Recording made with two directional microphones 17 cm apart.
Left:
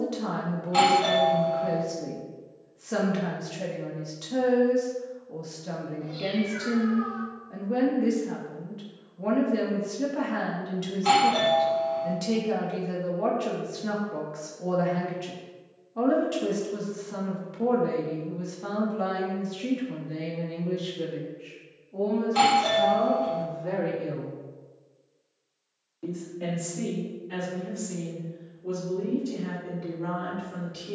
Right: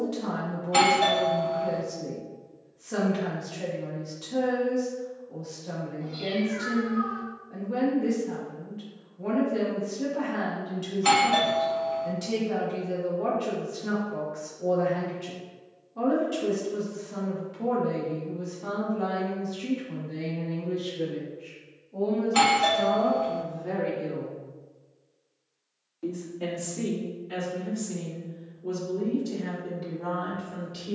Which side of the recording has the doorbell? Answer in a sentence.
In this clip you hear the doorbell on the right.